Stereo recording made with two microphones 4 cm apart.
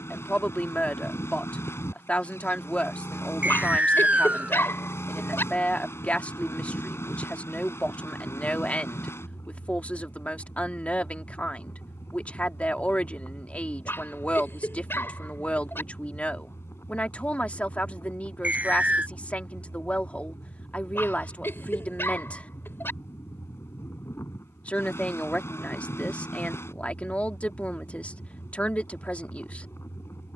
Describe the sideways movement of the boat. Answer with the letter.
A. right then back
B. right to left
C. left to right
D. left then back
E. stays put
E.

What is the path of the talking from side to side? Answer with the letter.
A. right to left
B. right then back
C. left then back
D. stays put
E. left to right
D.